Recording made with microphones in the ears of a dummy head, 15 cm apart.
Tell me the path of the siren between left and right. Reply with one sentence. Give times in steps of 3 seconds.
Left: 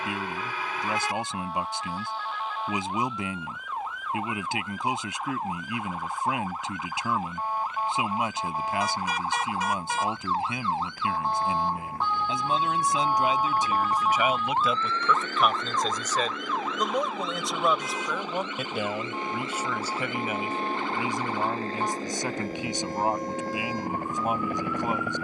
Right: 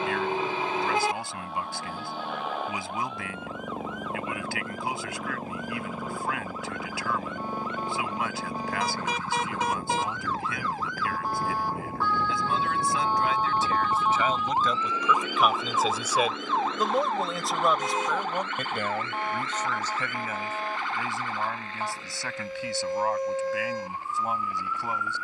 In this clip you hear the siren on the left from 0 s, in the centre from 12 s and on the right from 15 s.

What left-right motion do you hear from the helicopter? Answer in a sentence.
In this clip you hear the helicopter move from right to left.